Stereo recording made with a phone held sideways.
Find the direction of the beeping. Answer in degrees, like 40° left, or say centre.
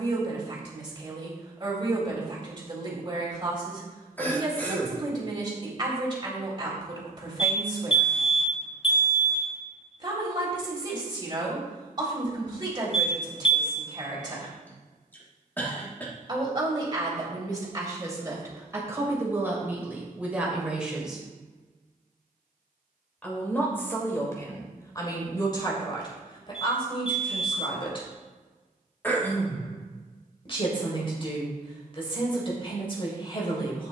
40° left.